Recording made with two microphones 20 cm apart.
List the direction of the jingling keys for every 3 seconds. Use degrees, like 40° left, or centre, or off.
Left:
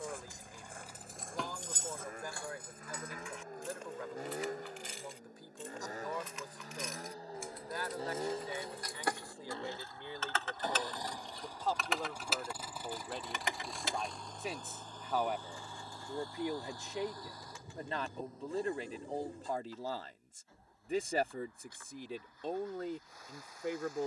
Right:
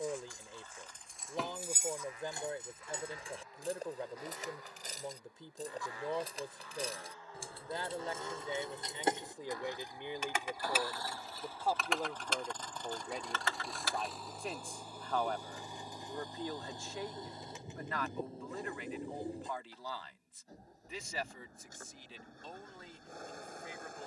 centre, 40° right, 30° right, 10° right, 10° left, off, off, off.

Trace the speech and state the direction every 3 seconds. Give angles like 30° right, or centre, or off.
30° right, 30° right, 20° right, 20° right, centre, 20° left, 40° left, 60° left.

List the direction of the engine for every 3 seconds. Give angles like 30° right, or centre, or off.
50° left, 50° left, 40° left, 20° left, centre, 20° right, 30° right, 50° right.